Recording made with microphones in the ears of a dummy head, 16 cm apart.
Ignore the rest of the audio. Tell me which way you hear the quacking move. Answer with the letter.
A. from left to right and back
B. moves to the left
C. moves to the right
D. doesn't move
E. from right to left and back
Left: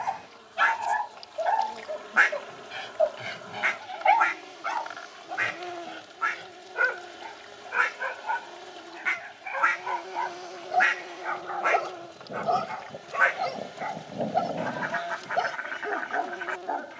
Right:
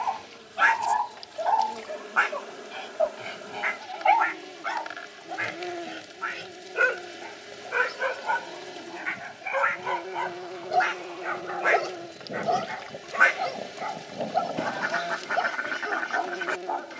E.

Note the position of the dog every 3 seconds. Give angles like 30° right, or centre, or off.
20° left, centre, 50° right, 50° right, centre, 10° left.